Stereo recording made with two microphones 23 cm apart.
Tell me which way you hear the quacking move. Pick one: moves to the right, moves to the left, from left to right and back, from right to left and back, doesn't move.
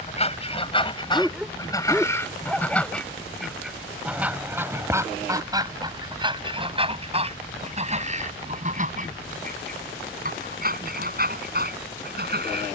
moves to the right.